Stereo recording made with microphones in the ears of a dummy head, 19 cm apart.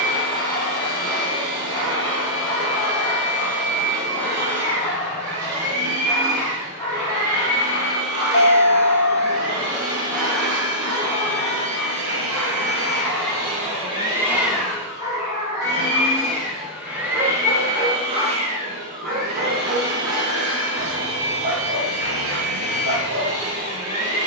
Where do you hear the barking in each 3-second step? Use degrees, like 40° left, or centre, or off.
20° left, 20° left, 20° left, 20° left, centre, 30° right, 60° right, 60° right.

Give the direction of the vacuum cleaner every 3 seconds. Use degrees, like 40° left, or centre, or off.
80° right, 80° right, 80° right, 80° right, 30° right, centre, 40° right, 70° right.